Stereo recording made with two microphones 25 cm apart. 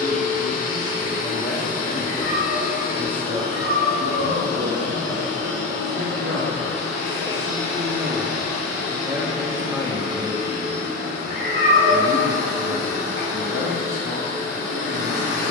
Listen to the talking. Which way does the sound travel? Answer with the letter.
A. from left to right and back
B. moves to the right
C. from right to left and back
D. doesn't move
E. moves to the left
A.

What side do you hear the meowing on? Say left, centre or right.
left.